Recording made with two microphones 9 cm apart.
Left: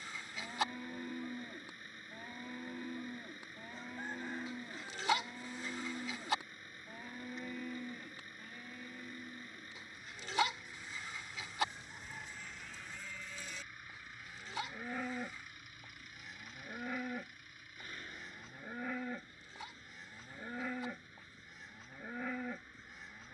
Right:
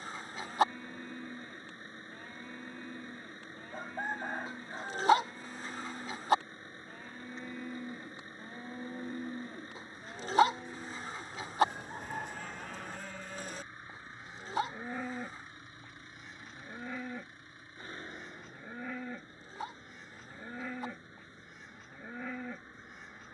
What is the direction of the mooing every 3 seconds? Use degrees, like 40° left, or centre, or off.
10° left, 10° left, 10° right, 70° right, 40° right, centre, centre, centre.